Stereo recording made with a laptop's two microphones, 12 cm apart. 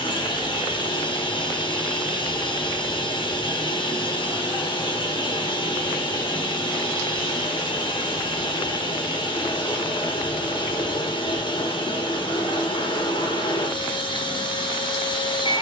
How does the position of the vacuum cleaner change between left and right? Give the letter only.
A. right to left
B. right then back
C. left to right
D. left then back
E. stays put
E.